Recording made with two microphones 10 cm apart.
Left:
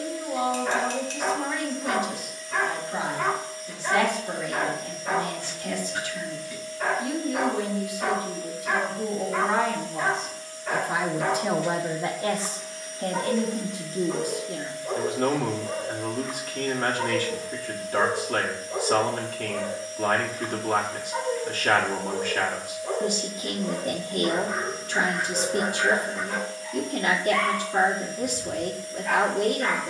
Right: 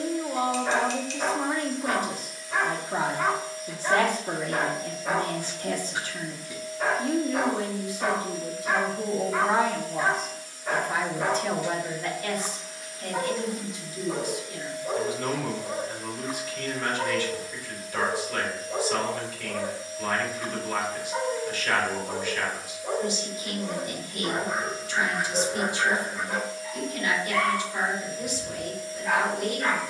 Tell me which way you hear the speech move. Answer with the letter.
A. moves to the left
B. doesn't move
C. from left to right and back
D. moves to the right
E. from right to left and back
A.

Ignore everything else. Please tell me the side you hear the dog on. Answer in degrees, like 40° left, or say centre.
10° right.